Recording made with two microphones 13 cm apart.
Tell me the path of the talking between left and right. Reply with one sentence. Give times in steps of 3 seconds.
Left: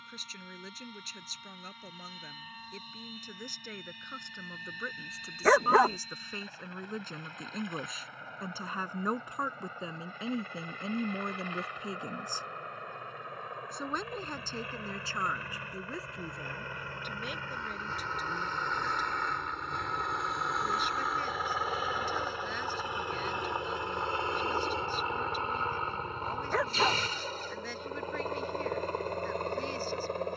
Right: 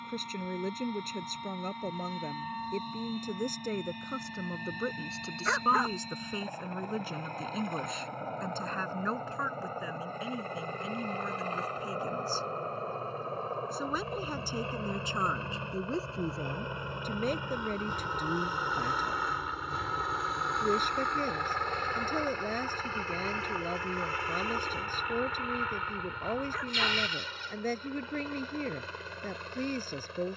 You can hear the talking on the right from 0 s, in the centre from 6 s, on the left from 9 s, in the centre from 12 s and on the right from 15 s.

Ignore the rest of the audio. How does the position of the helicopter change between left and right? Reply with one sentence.
You can hear the helicopter move to the left.